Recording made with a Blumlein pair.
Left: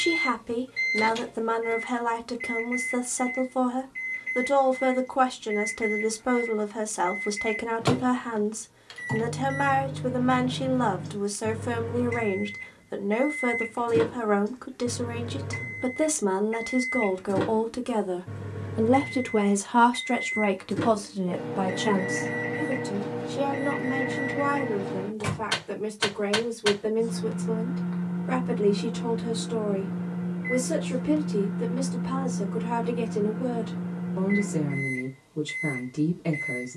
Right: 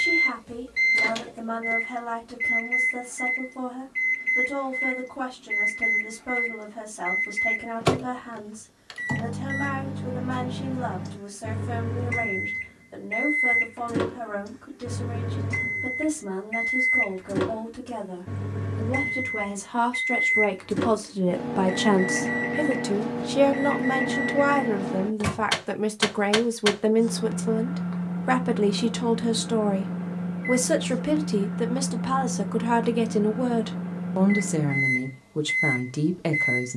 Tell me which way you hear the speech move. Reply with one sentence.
You can hear the speech travel towards the right.